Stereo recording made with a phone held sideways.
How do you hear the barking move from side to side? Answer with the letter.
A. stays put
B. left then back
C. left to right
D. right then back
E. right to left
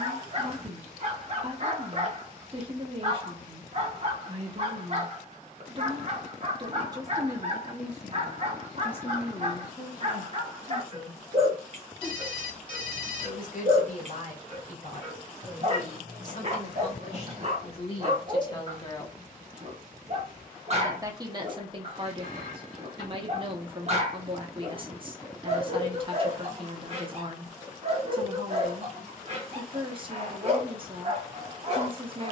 A.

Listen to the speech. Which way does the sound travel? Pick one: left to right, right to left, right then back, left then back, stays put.
left then back.